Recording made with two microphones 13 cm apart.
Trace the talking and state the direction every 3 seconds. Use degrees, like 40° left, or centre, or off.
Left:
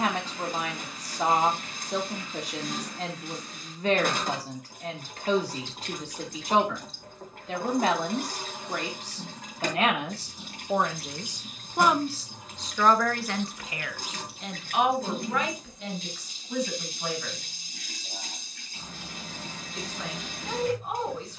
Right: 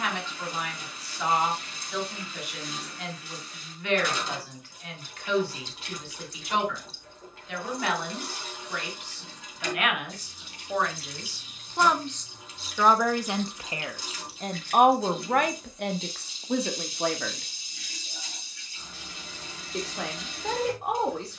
40° left, 40° left, 40° left, 30° left, 20° right, 70° right, 80° right.